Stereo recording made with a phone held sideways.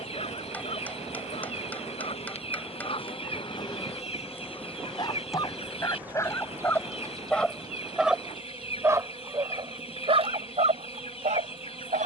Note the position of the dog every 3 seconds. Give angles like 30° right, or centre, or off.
50° left, 30° left, centre, 50° right.